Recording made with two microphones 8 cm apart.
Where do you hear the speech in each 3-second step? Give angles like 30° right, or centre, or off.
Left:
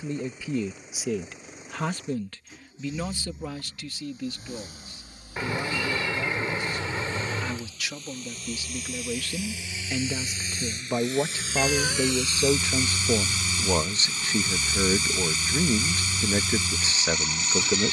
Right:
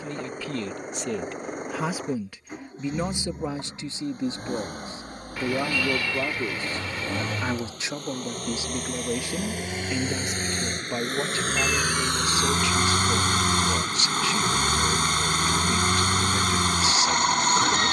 centre, 30° right, 30° right, centre, 30° left, 30° left.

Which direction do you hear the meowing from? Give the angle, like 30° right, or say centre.
30° left.